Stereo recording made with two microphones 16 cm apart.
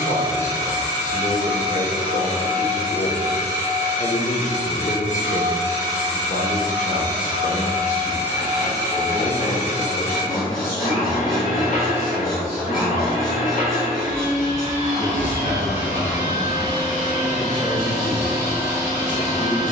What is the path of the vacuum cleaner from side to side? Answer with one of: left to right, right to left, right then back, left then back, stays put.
stays put.